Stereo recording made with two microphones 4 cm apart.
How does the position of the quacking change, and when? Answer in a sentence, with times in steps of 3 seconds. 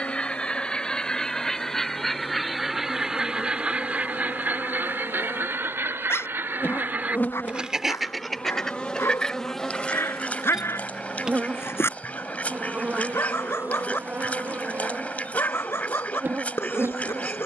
You can hear the quacking in the centre from 0 s, on the right from 3 s and on the left from 9 s.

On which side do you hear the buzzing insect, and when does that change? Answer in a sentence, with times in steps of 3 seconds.
In this clip you hear the buzzing insect on the left from 0 s, in the centre from 9 s and on the right from 12 s.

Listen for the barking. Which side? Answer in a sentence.
In this clip you hear the barking on the left.